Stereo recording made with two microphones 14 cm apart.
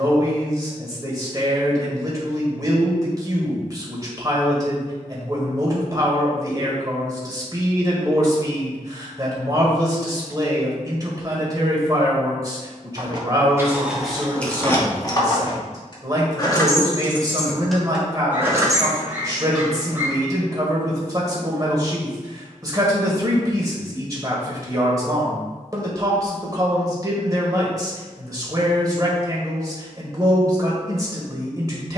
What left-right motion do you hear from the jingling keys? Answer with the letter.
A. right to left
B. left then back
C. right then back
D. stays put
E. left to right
B.